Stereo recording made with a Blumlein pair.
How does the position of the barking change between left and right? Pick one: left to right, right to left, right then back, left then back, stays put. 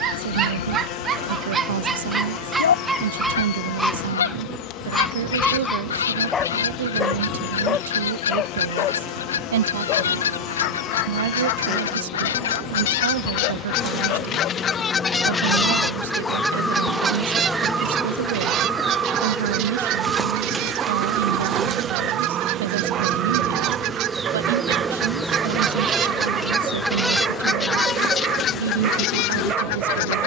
left then back.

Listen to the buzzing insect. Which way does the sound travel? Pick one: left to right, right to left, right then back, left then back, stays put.
right then back.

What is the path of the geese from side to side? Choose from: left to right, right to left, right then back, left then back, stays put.
right then back.